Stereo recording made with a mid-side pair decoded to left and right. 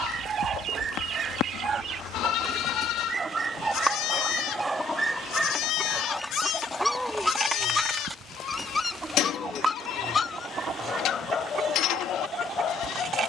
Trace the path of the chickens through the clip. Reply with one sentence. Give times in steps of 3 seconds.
You can hear the chickens on the right from 0 s, in the centre from 3 s and on the right from 9 s.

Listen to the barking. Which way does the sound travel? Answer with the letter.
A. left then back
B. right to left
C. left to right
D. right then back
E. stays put
B.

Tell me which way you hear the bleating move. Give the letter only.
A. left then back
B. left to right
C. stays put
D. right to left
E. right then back
C.